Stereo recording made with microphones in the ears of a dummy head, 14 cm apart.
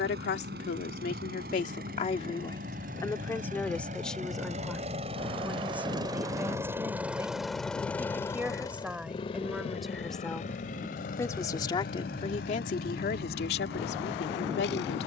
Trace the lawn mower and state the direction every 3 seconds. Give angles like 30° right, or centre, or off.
60° right, 40° right, centre, 50° left, 70° left.